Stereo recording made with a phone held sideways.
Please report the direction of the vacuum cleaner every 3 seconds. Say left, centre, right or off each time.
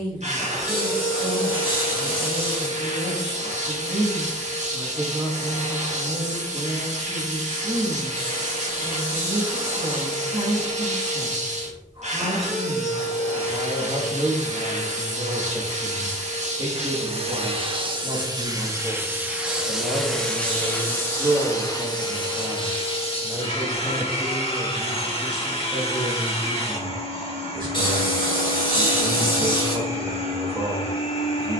right, right, right, right, right, right, centre, left, left, left, left.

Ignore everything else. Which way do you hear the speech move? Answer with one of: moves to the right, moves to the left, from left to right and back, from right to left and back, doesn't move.
doesn't move.